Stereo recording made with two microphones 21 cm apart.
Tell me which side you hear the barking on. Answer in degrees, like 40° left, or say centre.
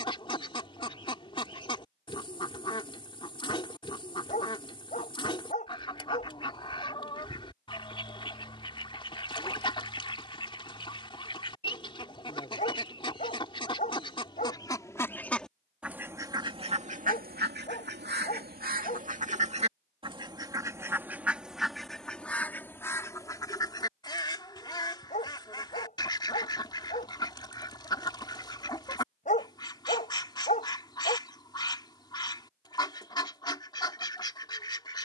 40° left.